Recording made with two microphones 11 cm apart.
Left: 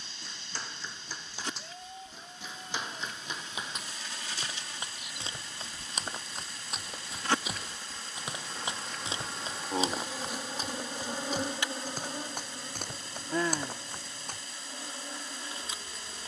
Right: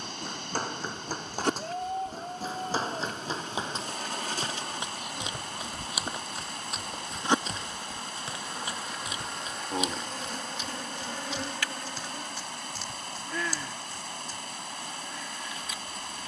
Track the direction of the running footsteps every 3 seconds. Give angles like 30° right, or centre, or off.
50° right, 20° right, 10° left, 40° left, 50° left, off.